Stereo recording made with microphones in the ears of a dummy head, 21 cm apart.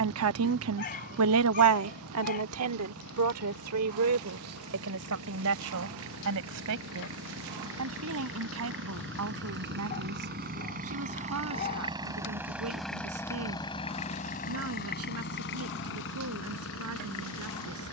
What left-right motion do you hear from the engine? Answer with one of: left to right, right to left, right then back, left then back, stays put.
right to left.